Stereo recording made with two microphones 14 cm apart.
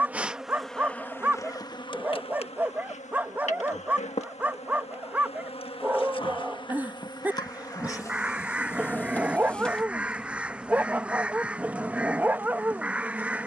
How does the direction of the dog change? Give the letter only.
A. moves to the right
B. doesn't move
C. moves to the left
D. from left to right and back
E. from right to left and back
B.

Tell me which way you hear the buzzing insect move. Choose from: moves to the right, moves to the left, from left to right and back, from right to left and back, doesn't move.
from right to left and back.